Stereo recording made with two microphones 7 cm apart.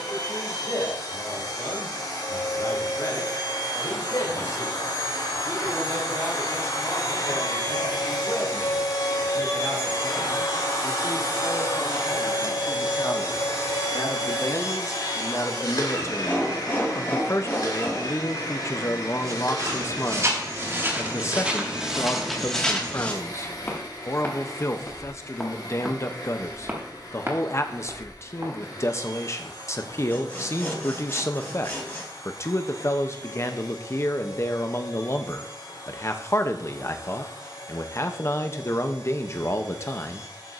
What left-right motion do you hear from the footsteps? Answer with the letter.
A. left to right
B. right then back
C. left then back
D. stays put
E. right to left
C.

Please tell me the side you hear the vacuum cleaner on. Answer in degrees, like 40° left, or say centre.
60° left.